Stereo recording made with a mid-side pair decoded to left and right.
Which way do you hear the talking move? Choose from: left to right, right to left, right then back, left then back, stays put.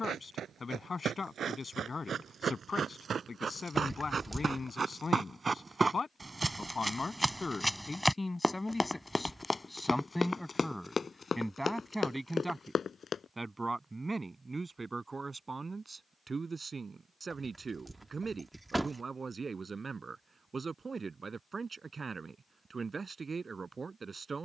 left to right.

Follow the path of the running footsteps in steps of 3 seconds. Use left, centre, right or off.
right, right, centre, left, left, off, off, off.